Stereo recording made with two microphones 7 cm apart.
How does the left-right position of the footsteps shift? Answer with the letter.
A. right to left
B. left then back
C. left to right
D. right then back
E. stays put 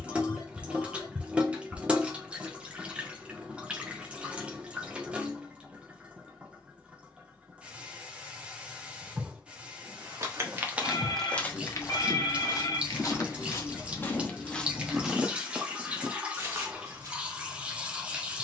B.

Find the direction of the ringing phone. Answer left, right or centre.
left.